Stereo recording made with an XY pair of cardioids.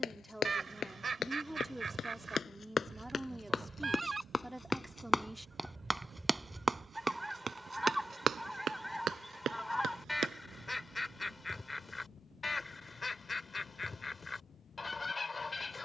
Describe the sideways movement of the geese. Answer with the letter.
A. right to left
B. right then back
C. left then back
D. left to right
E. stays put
A.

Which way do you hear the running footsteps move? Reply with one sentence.
You can hear the running footsteps move to the right.